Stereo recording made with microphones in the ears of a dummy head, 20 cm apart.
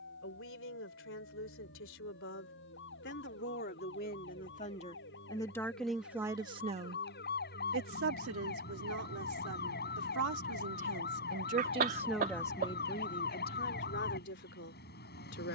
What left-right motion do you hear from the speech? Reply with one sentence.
In this clip you hear the speech go right and come back.